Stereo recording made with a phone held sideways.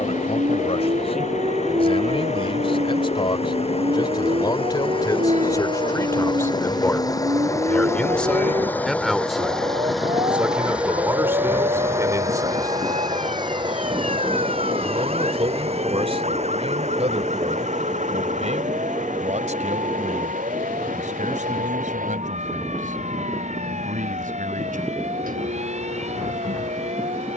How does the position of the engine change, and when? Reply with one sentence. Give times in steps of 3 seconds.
You can hear the engine on the left from 0 s, in the centre from 9 s and on the right from 12 s.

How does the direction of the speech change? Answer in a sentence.
You can hear the speech travel towards the right.